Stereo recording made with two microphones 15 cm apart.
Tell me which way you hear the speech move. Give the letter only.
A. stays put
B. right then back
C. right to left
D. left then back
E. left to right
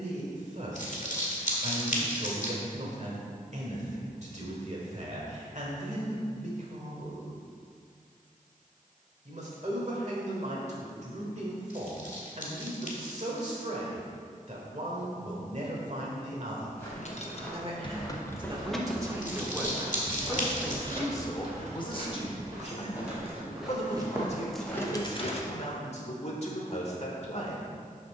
C.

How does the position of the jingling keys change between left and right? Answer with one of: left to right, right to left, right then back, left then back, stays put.
right then back.